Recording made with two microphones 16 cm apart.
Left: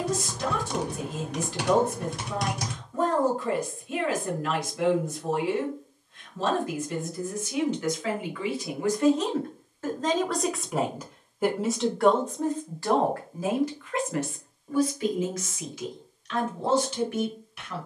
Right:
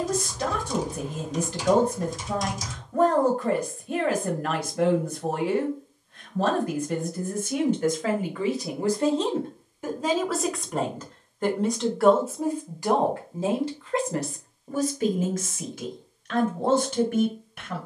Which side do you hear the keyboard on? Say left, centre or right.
left.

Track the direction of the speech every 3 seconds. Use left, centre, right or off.
right, right, right, centre, right, right.